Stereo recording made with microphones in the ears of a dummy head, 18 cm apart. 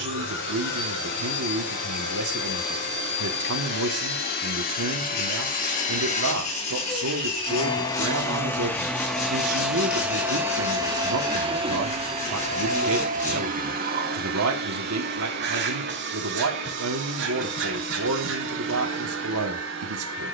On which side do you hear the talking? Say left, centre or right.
right.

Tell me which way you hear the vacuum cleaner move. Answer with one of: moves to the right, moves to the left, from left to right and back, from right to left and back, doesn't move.
moves to the right.